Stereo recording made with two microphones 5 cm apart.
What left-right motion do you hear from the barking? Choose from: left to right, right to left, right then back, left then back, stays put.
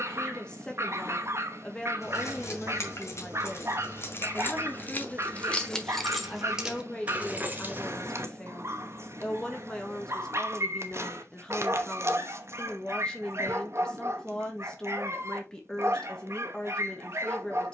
stays put.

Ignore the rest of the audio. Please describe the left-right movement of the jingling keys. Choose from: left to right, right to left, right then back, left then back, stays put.
left to right.